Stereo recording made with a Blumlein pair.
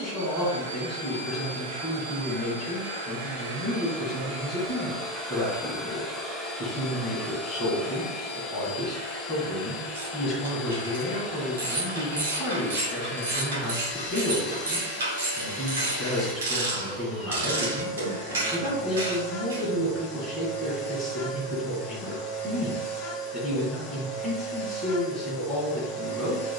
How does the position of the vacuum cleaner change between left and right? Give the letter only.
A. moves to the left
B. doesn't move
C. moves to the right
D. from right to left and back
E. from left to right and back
A.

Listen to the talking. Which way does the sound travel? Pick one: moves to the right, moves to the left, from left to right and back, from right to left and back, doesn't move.
doesn't move.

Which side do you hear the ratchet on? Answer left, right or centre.
right.